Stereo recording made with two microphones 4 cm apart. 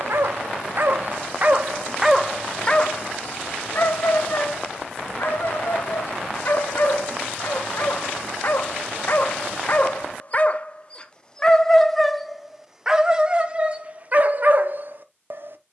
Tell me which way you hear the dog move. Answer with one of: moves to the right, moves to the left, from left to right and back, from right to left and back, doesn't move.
from right to left and back.